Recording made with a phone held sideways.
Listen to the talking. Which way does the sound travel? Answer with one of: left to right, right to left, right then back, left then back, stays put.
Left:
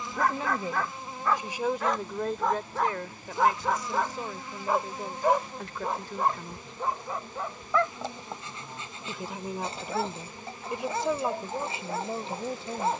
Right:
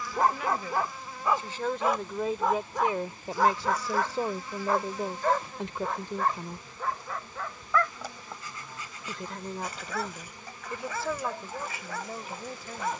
right then back.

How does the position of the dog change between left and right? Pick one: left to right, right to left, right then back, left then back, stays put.
right to left.